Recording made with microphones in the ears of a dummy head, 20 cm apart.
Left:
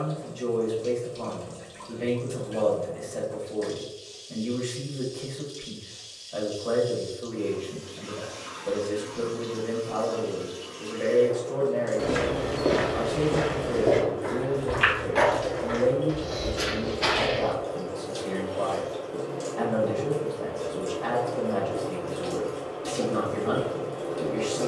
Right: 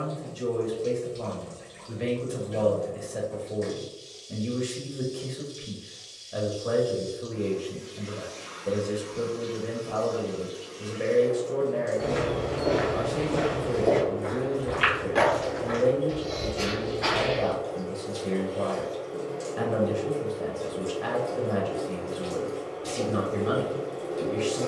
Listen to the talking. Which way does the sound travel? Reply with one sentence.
You can hear the talking stay put.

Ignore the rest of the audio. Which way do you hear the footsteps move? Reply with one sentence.
In this clip you hear the footsteps go right and come back.